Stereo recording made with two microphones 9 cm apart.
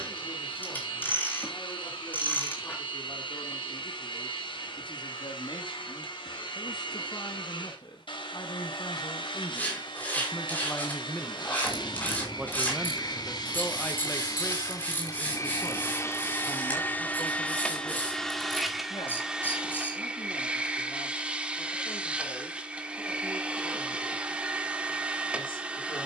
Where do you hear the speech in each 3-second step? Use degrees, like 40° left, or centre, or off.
70° left, 70° left, 50° left, 30° left, 10° left, 50° left, 70° left, 70° left, 70° left.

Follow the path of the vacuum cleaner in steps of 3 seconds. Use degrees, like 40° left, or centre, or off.
70° left, 70° left, 70° left, 70° left, 50° left, 30° left, 10° right, 10° right, 10° right.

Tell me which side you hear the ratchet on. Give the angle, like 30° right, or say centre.
20° left.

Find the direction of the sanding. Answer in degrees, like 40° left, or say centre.
20° left.